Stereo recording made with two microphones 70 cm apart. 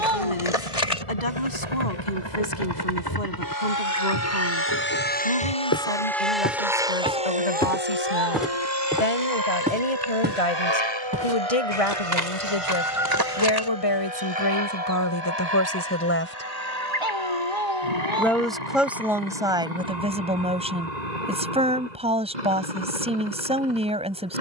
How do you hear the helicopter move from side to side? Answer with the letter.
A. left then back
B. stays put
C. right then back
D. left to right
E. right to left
D.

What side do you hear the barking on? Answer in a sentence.
In this clip you hear the barking on the right.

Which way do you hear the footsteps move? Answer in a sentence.
You can hear the footsteps move from left to right.